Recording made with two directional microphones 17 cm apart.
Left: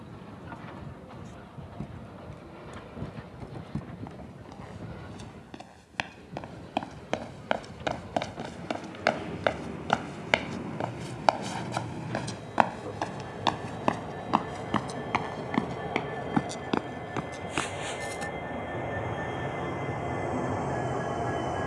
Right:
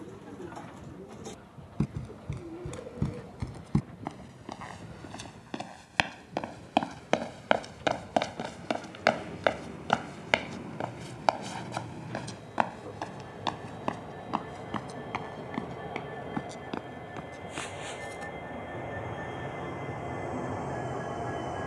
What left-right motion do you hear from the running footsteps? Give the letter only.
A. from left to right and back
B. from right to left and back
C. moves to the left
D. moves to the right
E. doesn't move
C.